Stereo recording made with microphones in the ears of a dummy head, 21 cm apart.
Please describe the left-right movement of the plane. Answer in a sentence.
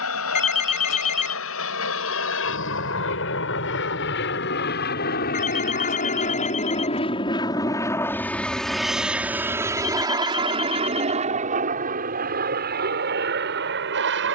You can hear the plane travel towards the right.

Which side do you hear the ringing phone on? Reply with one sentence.
You can hear the ringing phone on the left.